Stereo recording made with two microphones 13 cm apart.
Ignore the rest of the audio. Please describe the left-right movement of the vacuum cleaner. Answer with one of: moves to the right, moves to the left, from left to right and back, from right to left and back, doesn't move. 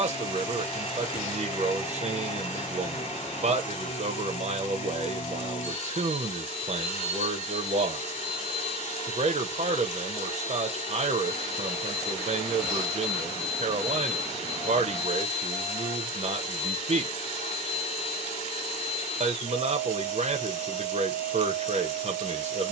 doesn't move.